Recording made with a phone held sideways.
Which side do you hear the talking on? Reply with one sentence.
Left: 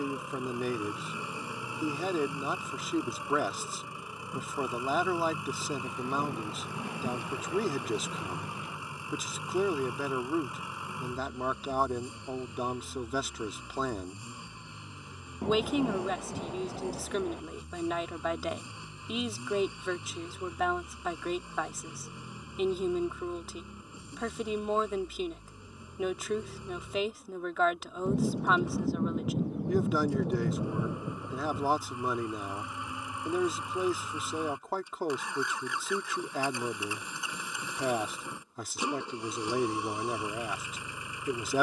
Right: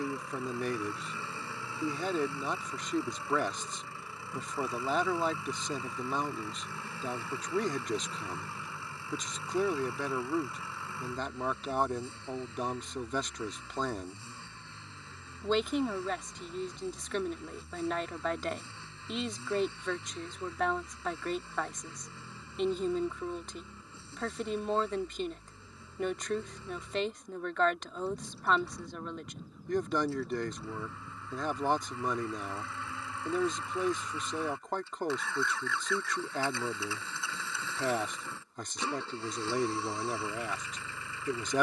In this clip you hear the talking in the centre.